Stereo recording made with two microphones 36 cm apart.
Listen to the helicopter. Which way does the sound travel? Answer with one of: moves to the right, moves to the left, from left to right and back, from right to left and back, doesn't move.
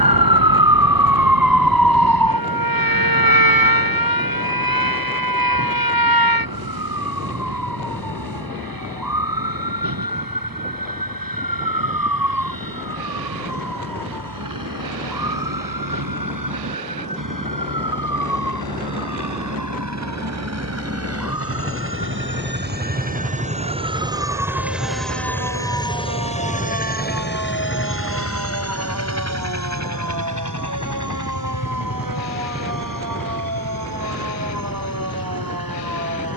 moves to the left.